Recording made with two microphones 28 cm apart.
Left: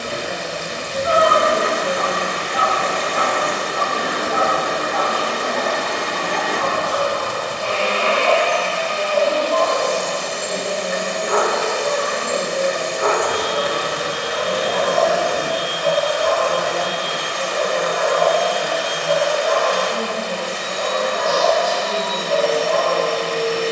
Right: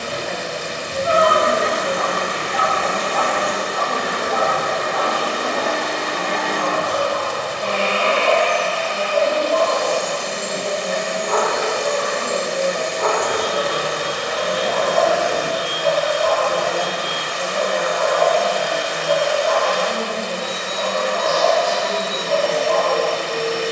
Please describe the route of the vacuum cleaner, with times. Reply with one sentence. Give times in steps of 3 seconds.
In this clip you hear the vacuum cleaner on the right from 0 s, in the centre from 3 s, on the left from 6 s and on the right from 9 s.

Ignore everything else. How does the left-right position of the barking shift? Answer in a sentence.
In this clip you hear the barking go right and come back.